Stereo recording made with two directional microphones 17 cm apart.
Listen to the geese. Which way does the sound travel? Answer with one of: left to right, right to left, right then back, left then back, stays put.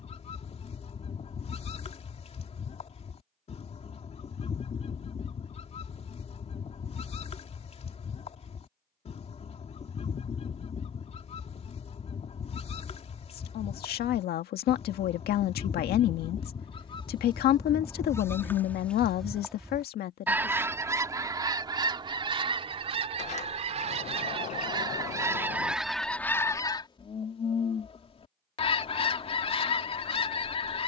right then back.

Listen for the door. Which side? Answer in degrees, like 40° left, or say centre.
40° left.